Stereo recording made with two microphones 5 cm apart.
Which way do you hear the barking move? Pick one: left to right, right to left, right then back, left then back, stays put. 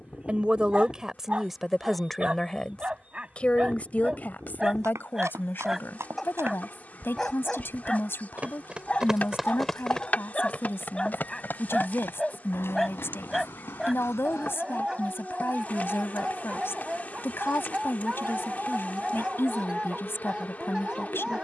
left then back.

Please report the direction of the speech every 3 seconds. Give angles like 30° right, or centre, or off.
centre, 40° left, 50° left, 50° left, 50° left, 50° left, 50° left.